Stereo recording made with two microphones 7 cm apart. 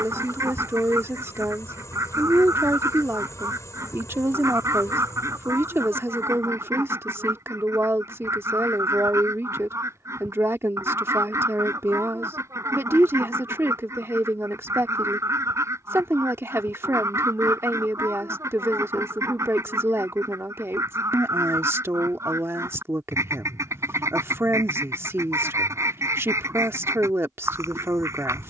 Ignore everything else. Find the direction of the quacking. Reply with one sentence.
In this clip you hear the quacking on the right.